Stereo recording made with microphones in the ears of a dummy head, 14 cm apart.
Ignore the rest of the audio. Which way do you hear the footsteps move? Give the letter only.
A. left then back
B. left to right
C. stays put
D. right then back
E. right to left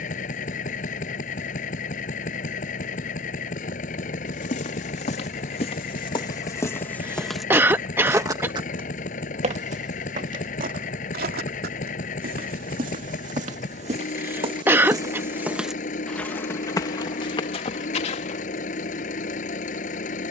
D.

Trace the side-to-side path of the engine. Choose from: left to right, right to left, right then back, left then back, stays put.
stays put.